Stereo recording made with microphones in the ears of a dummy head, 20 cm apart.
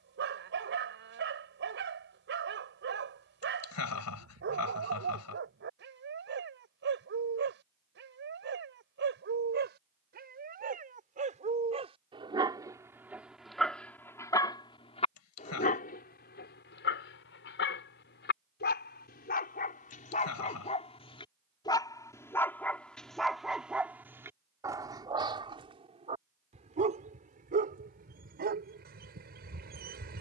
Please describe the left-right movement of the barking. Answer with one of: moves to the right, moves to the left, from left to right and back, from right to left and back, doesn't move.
from right to left and back.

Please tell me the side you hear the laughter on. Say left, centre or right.
left.